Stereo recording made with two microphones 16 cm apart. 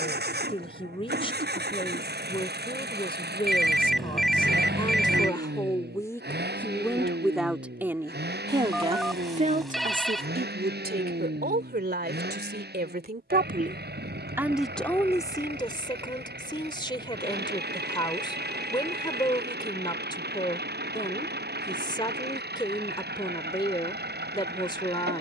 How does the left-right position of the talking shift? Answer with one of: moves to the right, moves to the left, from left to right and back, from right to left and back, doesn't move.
from left to right and back.